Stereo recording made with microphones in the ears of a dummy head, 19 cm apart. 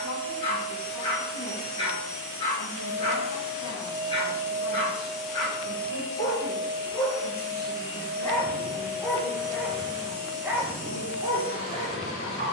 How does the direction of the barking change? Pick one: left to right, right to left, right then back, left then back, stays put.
left to right.